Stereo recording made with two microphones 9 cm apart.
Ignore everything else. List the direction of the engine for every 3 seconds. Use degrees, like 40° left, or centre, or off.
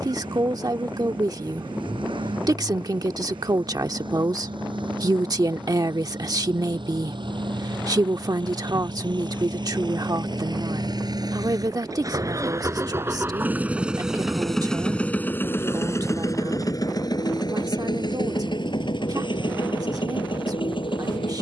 80° right, 70° right, 70° right, 60° right, 20° right, 40° left, 70° left.